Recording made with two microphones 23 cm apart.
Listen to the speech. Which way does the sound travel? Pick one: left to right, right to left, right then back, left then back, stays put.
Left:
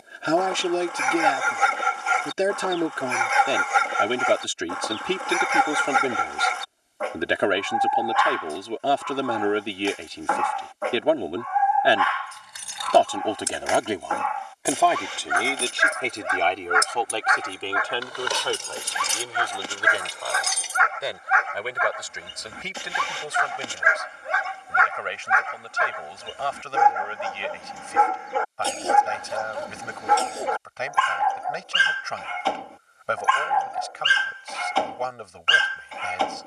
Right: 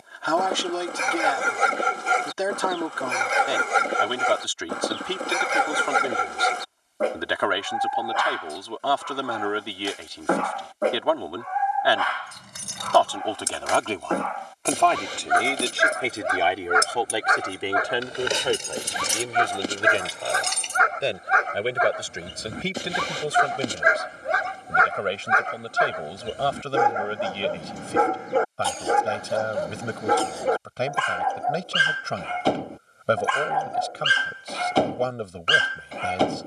left to right.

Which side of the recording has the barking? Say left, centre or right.
right.